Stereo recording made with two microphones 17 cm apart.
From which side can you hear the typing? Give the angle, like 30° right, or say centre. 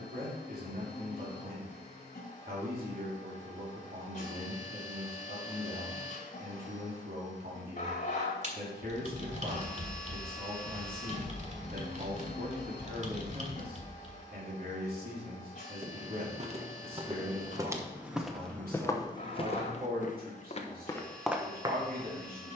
40° right.